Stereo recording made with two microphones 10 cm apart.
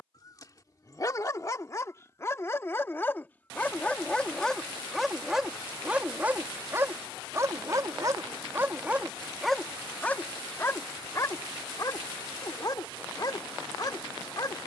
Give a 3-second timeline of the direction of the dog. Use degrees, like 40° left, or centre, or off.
30° left, 10° left, 30° right, 20° left, 40° left.